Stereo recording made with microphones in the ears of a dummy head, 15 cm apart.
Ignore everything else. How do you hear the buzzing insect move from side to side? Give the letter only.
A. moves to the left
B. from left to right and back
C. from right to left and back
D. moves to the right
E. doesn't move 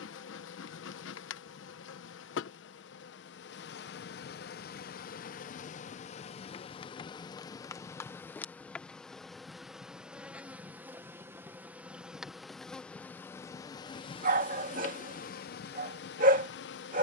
B.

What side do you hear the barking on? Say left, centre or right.
right.